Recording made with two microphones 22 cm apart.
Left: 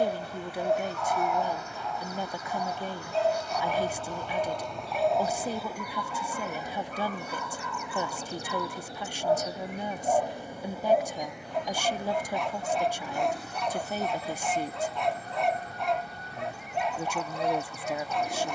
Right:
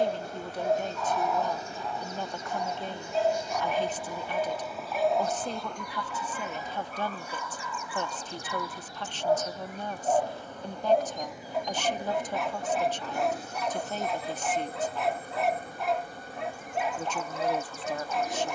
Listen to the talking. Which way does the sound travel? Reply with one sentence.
In this clip you hear the talking stay put.